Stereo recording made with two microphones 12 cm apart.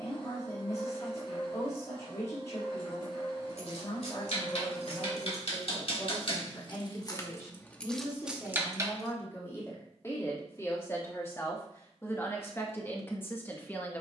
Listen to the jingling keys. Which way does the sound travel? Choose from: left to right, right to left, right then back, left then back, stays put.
left to right.